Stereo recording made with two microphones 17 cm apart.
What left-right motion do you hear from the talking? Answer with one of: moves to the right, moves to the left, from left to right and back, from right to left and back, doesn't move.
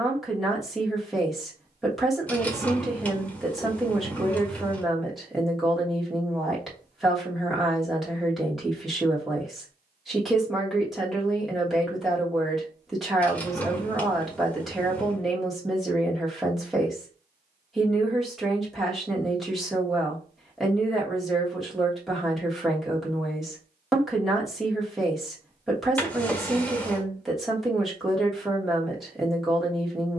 doesn't move.